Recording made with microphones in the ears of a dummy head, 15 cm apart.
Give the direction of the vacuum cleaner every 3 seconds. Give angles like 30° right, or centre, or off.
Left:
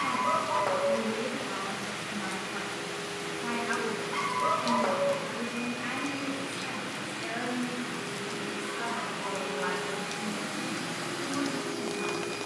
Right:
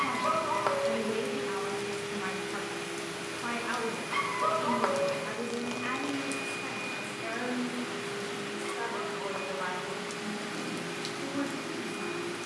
50° right, 40° right, centre, 50° left.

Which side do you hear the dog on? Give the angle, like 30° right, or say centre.
60° right.